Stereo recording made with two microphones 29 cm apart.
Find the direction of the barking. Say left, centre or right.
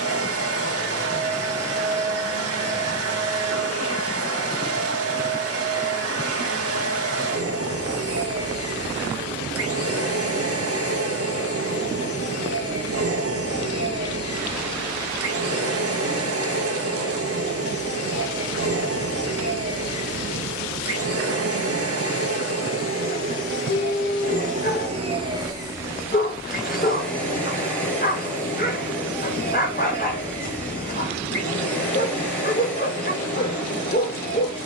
left.